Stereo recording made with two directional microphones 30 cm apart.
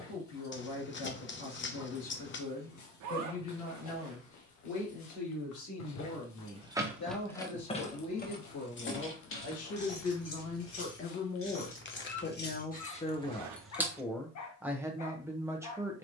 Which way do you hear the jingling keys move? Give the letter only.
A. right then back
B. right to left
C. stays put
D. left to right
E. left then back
E.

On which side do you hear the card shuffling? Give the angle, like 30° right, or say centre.
40° left.